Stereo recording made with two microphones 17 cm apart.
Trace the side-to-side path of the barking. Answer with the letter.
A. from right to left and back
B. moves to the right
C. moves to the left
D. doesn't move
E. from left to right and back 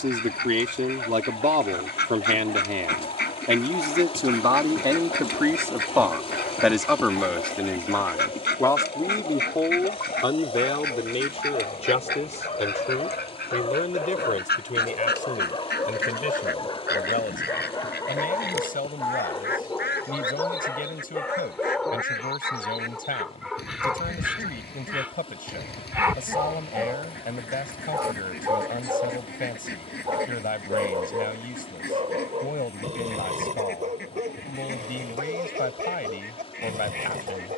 B.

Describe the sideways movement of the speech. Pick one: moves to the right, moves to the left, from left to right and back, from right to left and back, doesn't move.
moves to the left.